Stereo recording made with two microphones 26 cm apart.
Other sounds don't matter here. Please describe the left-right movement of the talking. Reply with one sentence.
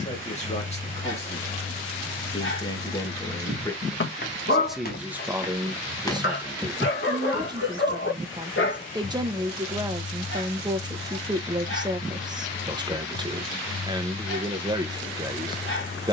In this clip you hear the talking go from the left side to the right.